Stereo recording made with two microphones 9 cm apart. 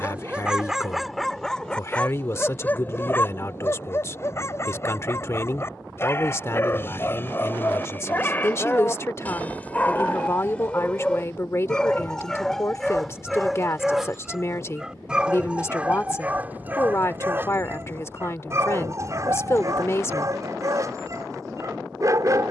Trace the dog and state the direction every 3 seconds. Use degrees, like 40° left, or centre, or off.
centre, 30° left, 20° left, 10° left, centre, 20° right, 40° right, 40° right.